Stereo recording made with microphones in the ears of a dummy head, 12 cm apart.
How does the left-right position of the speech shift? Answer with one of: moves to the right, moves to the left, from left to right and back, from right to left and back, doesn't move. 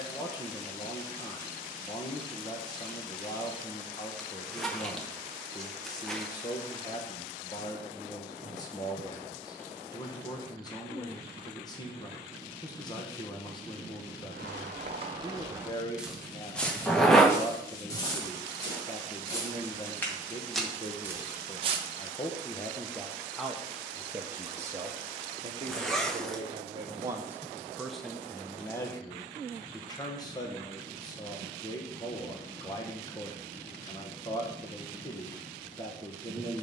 from left to right and back.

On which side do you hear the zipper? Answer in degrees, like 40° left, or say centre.
centre.